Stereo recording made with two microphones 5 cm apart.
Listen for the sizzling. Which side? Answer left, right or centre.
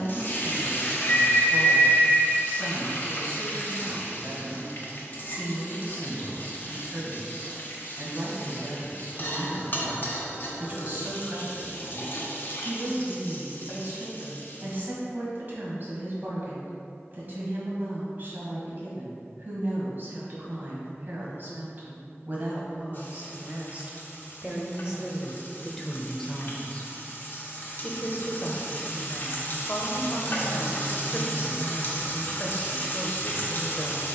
left.